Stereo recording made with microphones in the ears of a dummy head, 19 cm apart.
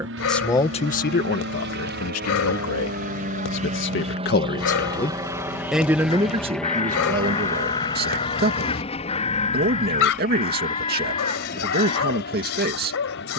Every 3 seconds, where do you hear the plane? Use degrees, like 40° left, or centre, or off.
50° right, 20° right, 10° left, 30° left, 40° left.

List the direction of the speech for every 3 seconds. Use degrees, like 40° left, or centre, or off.
50° left, 40° left, 40° right, 40° right, 40° right.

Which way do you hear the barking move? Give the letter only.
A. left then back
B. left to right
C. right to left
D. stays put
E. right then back
D.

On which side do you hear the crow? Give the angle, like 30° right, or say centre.
30° left.